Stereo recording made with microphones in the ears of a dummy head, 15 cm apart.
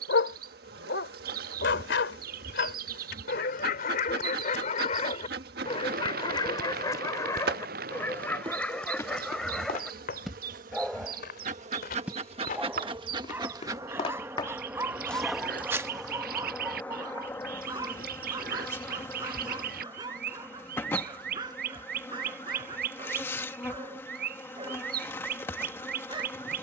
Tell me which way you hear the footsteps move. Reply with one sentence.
In this clip you hear the footsteps go left and come back.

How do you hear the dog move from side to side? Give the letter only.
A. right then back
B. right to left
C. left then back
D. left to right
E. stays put
D.